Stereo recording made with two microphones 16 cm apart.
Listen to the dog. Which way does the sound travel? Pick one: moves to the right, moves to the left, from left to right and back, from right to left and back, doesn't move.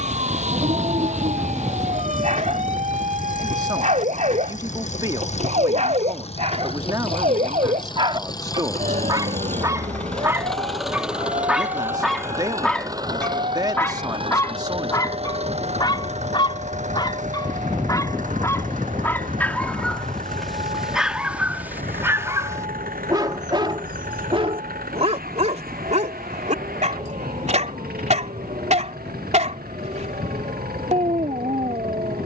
from right to left and back.